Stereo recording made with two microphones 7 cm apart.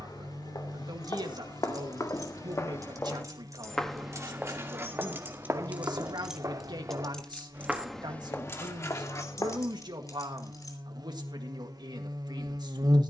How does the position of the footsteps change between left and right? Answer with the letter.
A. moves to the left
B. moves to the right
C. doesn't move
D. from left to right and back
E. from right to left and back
D.